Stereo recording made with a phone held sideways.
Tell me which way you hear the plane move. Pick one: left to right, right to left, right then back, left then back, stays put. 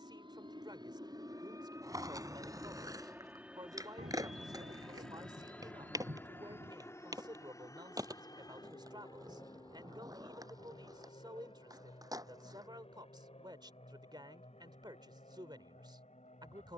right to left.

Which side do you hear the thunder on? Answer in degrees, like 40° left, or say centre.
70° right.